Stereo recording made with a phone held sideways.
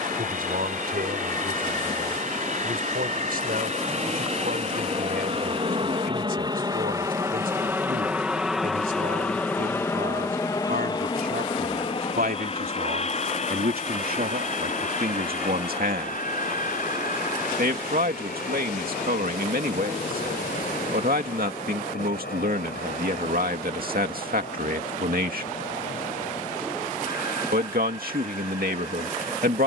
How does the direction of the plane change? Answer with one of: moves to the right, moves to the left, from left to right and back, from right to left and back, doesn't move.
moves to the left.